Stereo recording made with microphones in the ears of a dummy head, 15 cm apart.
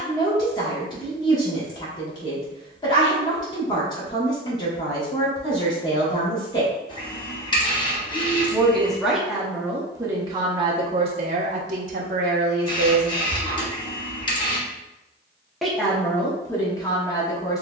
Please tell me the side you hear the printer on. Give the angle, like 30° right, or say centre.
30° left.